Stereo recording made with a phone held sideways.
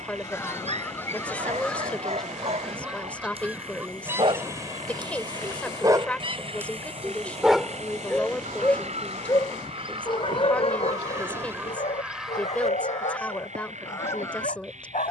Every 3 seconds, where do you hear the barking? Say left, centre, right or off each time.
right, right, centre, left, left.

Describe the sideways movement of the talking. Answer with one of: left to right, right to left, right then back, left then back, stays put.
stays put.